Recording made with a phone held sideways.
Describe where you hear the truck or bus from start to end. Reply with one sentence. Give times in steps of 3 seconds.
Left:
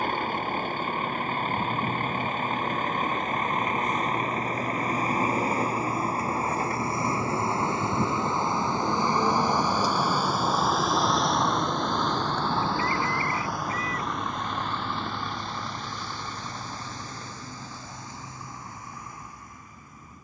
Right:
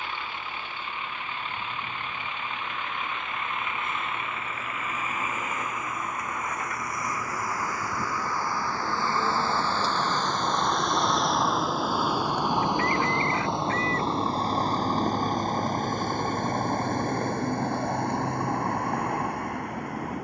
You can hear the truck or bus on the left from 0 s, in the centre from 9 s and on the right from 12 s.